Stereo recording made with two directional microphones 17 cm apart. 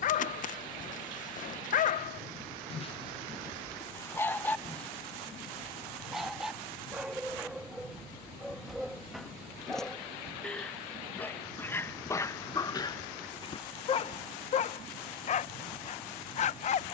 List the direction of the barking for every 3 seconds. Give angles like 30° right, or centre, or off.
50° left, 10° left, centre, 10° left, 30° left, 40° left.